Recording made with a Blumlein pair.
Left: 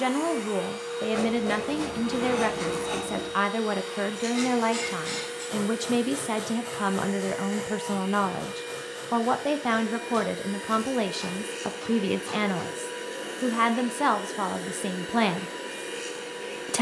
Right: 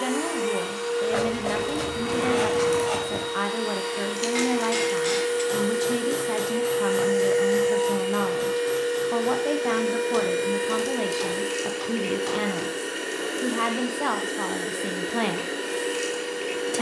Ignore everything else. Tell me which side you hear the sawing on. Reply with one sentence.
In this clip you hear the sawing on the right.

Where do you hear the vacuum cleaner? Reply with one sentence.
In this clip you hear the vacuum cleaner on the right.